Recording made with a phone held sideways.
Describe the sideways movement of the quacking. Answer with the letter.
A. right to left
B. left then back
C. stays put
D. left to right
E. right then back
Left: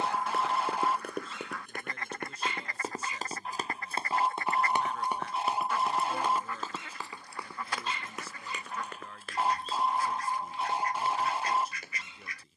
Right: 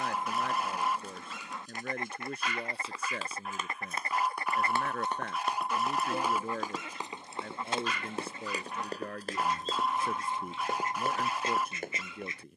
C.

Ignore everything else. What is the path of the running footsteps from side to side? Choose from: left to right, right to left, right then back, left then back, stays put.
left to right.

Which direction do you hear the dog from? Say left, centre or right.
left.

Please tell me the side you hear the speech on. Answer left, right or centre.
right.